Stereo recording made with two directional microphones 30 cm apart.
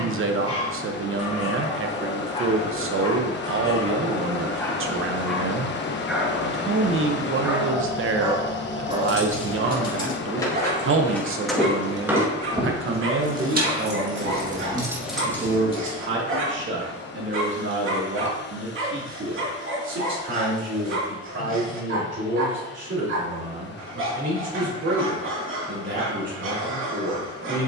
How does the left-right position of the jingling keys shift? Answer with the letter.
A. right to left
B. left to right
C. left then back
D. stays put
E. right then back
E.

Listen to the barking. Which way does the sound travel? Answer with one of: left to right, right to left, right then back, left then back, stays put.
left to right.